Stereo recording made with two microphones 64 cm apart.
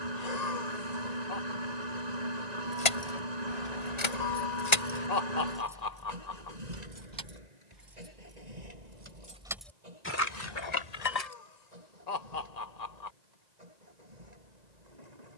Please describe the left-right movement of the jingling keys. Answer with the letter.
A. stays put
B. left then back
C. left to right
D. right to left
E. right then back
E.